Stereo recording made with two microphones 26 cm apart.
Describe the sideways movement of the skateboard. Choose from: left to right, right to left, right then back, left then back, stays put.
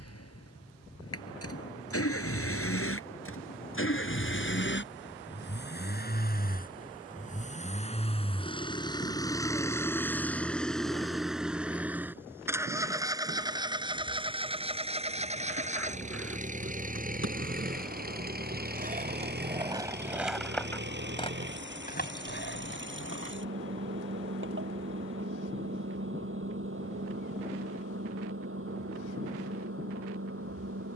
right to left.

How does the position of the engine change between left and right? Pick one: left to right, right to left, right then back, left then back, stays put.
left to right.